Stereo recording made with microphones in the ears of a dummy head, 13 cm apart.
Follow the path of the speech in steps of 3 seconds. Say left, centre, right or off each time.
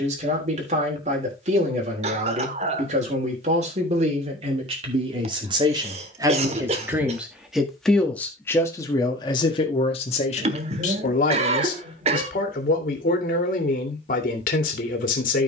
right, right, centre, left, left.